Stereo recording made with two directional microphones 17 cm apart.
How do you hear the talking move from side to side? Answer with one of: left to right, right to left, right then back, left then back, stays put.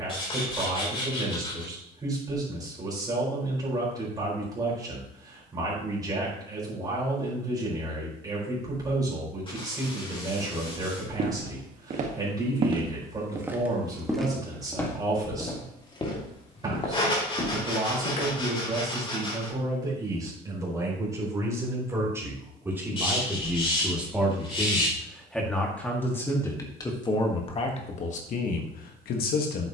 right to left.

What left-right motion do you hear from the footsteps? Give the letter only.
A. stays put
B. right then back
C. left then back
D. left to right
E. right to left
E.